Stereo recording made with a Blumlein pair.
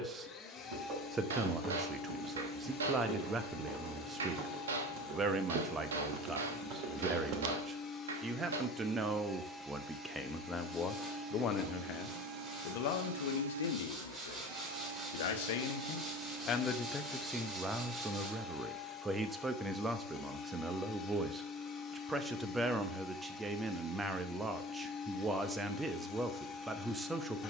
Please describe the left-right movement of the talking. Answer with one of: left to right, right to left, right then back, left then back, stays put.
left then back.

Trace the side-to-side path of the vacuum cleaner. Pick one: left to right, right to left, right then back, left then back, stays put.
right then back.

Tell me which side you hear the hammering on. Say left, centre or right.
right.